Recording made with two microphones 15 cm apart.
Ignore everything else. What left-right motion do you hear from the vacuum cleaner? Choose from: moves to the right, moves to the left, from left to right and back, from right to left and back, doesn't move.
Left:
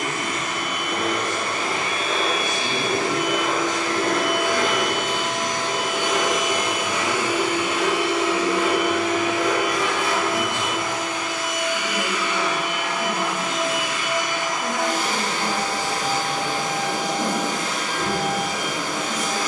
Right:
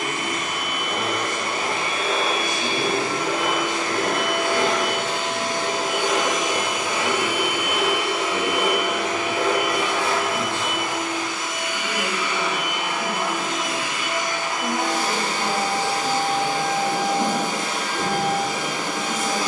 doesn't move.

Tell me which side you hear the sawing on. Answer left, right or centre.
right.